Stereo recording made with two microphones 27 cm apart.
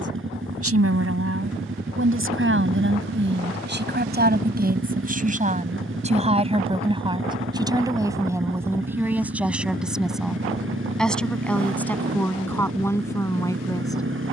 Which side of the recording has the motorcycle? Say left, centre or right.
right.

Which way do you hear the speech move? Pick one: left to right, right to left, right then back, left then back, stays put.
right to left.